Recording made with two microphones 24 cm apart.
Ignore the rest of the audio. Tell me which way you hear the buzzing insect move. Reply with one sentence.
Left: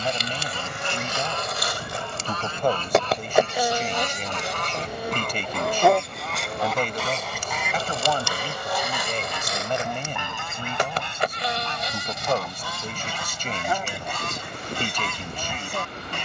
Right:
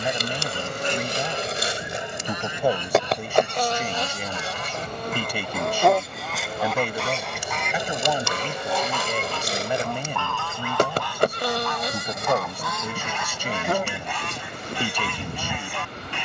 In this clip you hear the buzzing insect move from right to left and back again.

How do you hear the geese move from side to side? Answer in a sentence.
In this clip you hear the geese go from the right side to the left.